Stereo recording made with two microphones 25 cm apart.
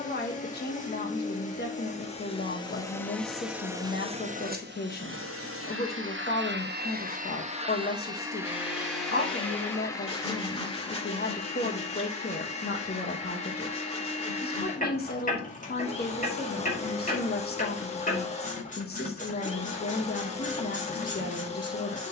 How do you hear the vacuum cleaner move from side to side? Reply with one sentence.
In this clip you hear the vacuum cleaner move from left to right and back again.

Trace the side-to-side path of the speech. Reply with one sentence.
In this clip you hear the speech stay put.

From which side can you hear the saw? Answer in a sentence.
In this clip you hear the saw on the left.